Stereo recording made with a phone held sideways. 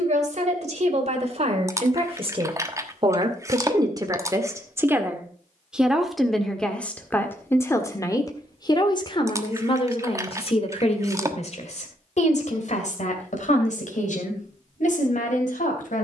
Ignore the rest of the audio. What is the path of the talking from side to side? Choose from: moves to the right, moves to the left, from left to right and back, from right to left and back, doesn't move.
moves to the left.